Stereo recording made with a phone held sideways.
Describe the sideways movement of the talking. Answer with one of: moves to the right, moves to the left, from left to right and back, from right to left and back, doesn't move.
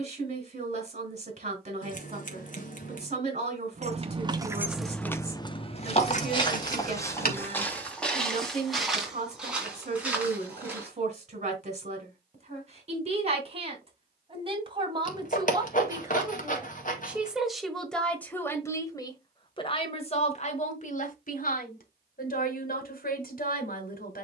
moves to the left.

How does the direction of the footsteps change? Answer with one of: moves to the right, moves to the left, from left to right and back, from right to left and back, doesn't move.
moves to the right.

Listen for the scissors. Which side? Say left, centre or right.
left.